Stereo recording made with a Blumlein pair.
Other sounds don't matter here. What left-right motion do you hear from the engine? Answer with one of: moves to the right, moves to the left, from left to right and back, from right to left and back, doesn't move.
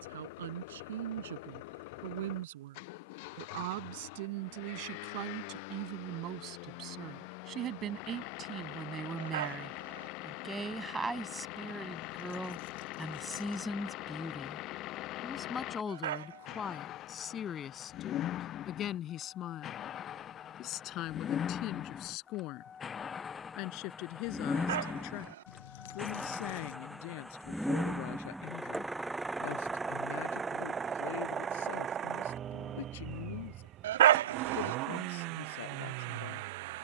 moves to the right.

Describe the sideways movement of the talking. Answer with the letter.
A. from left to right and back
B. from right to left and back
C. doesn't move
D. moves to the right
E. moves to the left
E.